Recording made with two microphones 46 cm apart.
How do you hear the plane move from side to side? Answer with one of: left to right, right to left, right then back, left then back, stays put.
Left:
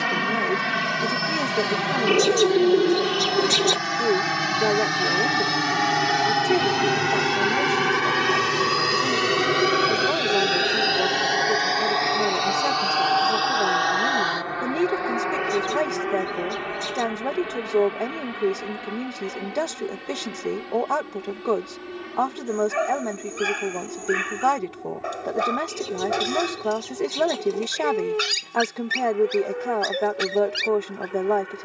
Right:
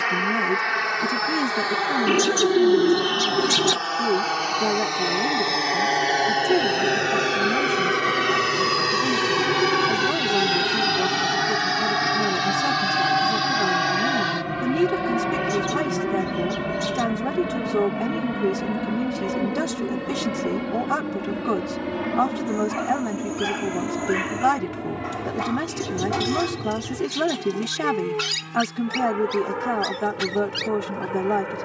left to right.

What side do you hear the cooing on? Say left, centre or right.
right.